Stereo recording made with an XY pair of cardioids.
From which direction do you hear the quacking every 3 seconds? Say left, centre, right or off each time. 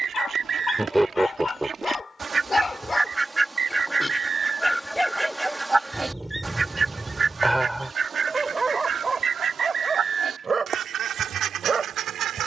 right, centre, right, right.